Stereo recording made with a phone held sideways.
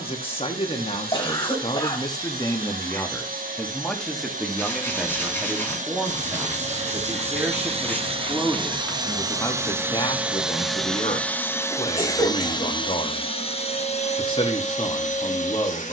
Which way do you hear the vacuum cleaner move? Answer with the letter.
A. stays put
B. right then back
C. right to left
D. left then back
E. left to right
C.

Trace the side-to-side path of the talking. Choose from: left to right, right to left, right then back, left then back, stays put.
right then back.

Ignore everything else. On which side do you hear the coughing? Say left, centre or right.
left.